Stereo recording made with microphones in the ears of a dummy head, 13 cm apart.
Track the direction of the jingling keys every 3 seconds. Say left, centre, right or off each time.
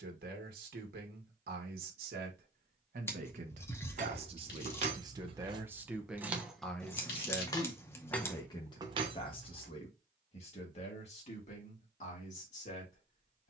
off, right, centre, right, off.